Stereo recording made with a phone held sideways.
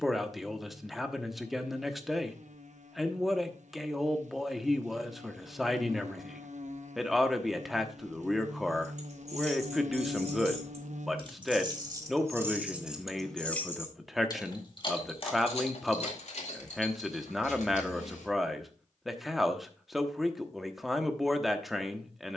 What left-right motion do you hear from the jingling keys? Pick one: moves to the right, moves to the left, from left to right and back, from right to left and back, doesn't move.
moves to the left.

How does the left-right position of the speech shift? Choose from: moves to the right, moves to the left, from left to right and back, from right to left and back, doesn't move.
doesn't move.